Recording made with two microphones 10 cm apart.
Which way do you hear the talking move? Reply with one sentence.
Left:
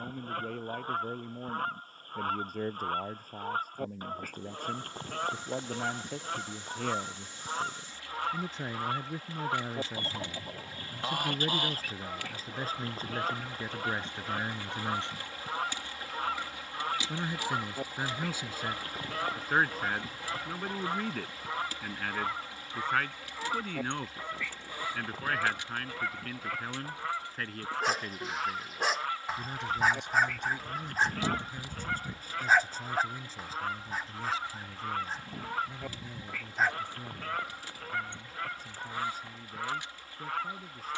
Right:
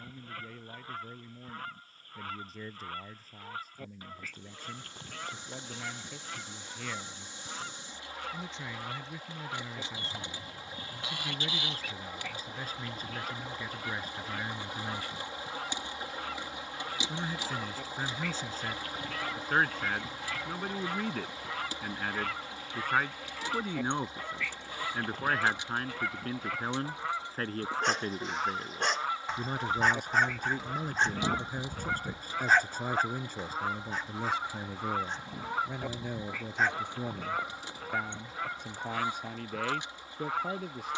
In this clip you hear the talking go from the left side to the right.